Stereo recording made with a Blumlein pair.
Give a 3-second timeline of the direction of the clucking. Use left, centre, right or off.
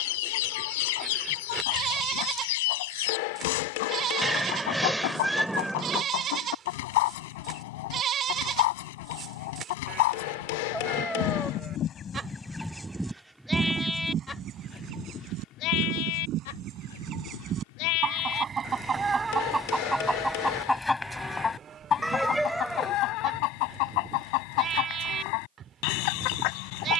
left, left, left, left, centre, right, centre, left, left.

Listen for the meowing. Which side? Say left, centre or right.
centre.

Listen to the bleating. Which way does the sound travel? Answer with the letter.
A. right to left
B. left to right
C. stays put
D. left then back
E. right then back
D.